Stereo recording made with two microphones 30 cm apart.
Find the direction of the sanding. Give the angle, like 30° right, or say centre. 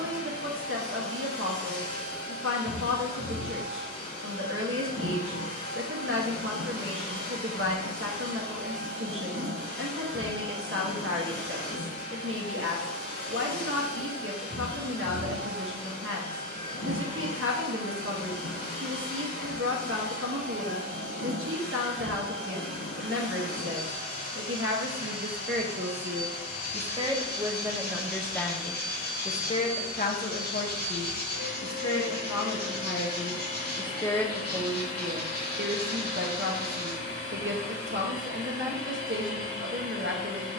30° left.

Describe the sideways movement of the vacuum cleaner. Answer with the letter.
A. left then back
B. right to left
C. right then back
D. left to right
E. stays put
E.